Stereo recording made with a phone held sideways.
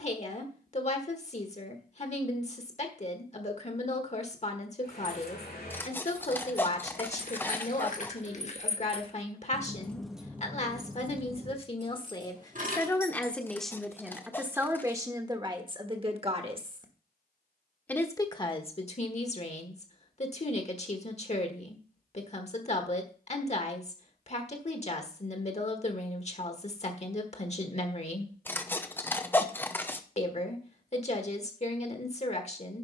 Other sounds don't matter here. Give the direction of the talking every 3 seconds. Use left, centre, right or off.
left, left, left, left, centre, right, left, left, left, left, left.